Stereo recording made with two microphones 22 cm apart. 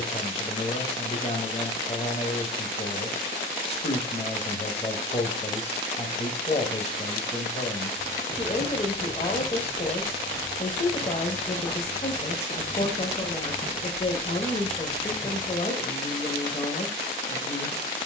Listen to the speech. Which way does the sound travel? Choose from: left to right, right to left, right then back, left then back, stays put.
stays put.